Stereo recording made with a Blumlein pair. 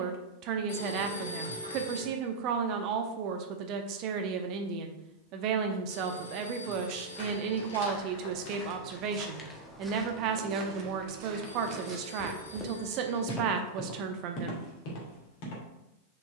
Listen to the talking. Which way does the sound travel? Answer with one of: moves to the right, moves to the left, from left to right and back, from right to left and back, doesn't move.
doesn't move.